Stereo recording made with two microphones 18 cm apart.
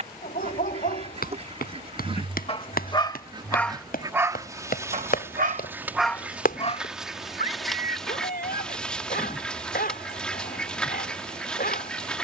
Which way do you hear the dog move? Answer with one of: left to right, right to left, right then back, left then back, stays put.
right then back.